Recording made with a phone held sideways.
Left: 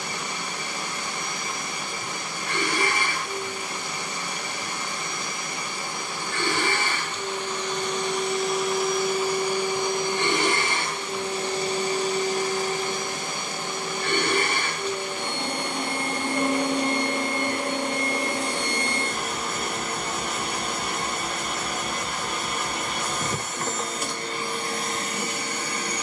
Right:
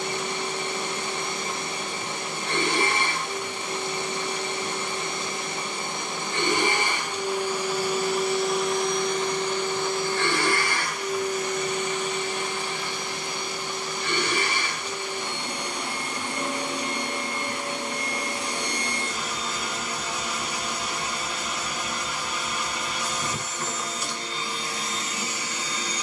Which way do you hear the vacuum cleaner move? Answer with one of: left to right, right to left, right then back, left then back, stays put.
right to left.